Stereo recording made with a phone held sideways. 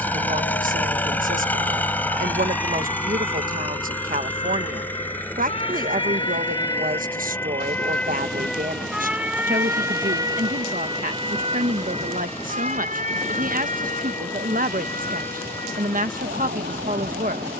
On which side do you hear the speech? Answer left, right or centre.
right.